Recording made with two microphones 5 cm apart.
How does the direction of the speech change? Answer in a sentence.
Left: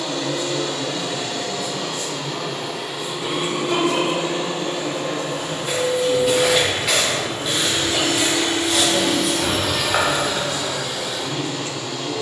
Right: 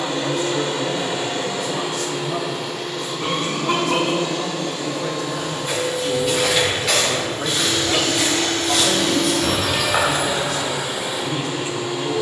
You can hear the speech stay put.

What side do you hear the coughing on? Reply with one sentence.
You can hear the coughing on the right.